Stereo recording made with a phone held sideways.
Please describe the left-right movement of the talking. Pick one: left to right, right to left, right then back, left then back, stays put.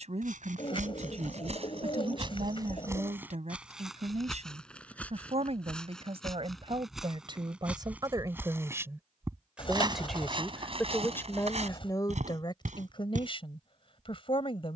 right to left.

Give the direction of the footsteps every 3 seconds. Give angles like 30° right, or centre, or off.
50° right, centre, 10° right, 40° right, 70° right.